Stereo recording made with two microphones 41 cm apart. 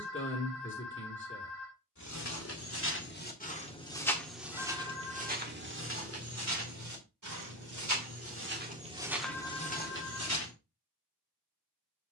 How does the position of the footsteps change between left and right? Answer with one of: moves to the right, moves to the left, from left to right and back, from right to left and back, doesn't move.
from left to right and back.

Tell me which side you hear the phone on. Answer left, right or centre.
right.